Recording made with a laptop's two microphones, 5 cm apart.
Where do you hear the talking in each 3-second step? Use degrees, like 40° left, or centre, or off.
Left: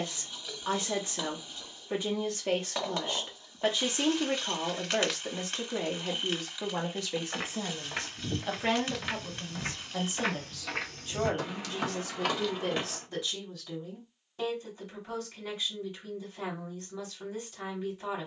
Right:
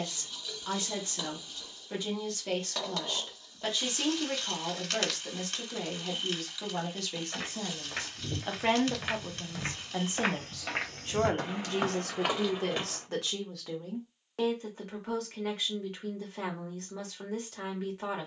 20° left, 20° left, 10° left, 50° right, 70° right, 80° right.